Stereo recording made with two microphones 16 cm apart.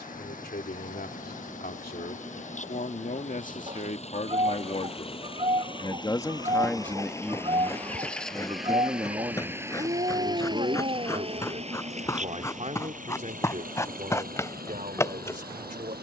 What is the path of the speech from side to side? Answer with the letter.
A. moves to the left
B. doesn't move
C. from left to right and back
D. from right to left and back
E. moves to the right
E.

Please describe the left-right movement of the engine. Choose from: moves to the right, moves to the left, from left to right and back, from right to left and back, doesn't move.
moves to the right.